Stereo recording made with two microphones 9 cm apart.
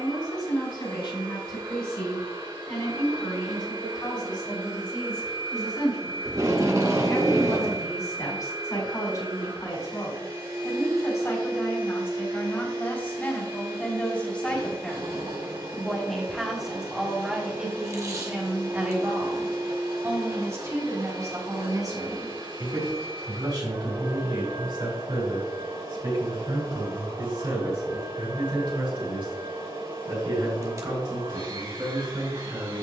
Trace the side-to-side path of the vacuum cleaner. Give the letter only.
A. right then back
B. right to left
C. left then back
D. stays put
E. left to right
D.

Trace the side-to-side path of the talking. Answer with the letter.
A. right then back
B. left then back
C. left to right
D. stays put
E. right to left
C.